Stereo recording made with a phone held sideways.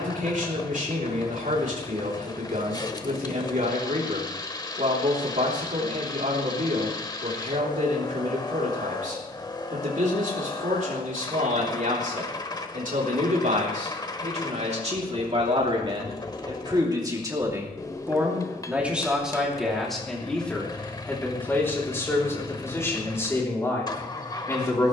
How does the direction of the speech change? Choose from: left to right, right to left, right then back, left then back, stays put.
right to left.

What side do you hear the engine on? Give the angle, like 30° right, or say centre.
20° left.